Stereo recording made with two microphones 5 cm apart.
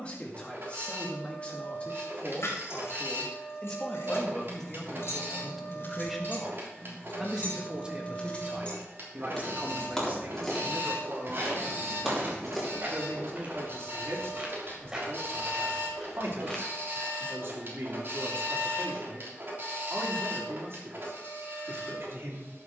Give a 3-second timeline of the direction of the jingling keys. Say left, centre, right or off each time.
left, left, left, centre, centre, off, off, off.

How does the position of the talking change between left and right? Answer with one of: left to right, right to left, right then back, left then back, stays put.
left to right.